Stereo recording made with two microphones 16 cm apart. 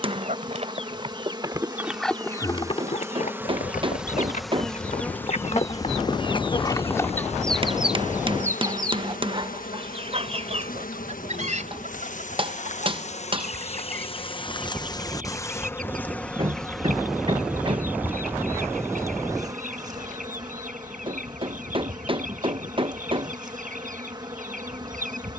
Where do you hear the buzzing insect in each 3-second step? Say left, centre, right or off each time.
right, centre, left, left, left, centre, right, right, right.